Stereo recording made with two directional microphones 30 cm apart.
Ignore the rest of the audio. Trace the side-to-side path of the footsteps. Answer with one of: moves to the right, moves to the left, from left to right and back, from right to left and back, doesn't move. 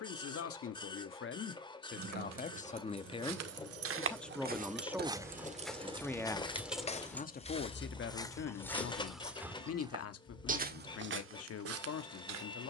from right to left and back.